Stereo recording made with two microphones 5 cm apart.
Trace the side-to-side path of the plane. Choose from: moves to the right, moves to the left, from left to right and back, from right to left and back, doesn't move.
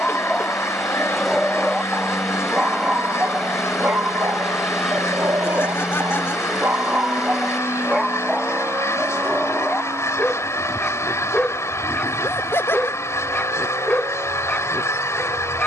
moves to the right.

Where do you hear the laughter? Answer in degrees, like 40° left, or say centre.
50° left.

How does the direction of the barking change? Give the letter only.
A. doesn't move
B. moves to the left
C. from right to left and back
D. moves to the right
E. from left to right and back
E.